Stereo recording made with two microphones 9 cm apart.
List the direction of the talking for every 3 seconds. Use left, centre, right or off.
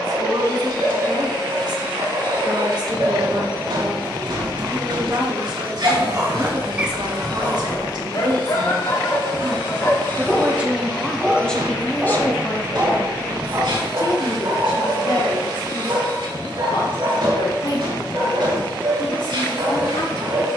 right, right, right, centre, left, left, left.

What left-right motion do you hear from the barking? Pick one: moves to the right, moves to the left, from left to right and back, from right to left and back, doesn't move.
from right to left and back.